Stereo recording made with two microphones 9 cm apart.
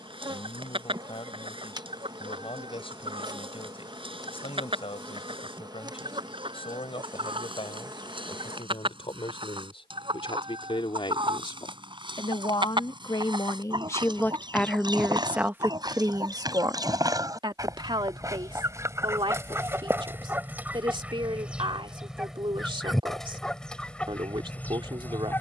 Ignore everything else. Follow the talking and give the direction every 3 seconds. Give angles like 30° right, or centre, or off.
80° left, 80° left, 80° left, 70° left, 30° left, 40° right, 60° right, 60° right, 60° right.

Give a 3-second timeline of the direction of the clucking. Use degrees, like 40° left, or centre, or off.
70° right, 70° right, 70° right, 70° right, 60° right, 50° right, 30° right, centre, 20° left.